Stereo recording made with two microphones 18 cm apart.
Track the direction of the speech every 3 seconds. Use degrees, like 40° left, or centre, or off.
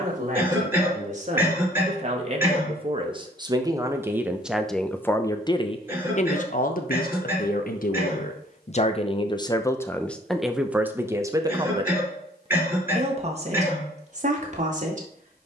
40° right, centre, 50° left, centre, 40° right.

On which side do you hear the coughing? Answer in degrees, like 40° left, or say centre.
10° right.